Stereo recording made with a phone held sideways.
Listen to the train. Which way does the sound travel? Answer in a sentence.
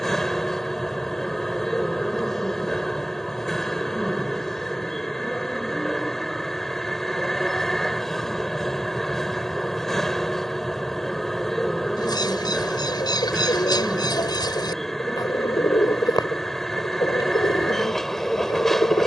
You can hear the train stay in one place.